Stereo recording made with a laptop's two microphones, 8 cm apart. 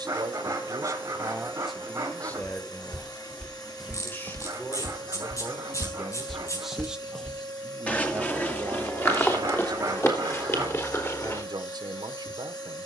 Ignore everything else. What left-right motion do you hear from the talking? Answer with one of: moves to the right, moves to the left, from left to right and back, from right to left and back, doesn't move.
from right to left and back.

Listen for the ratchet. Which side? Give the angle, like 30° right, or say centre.
40° left.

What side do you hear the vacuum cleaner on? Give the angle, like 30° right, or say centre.
60° left.